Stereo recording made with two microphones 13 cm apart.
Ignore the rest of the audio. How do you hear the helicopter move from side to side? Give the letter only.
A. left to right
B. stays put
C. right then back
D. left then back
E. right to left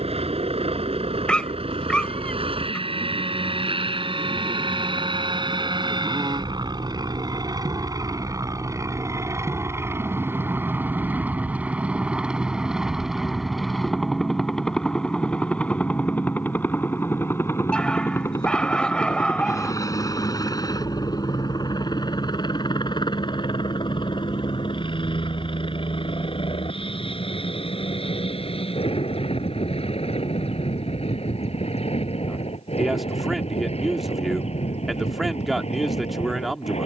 E.